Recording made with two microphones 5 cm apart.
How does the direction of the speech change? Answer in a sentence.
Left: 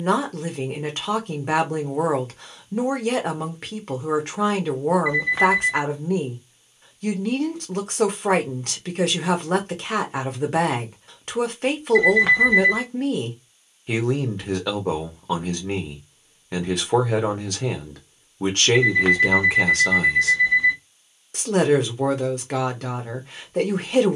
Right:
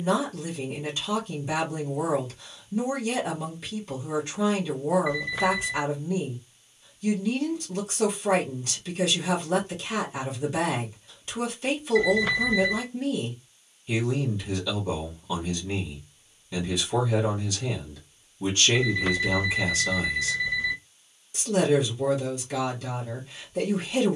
In this clip you hear the speech stay in one place.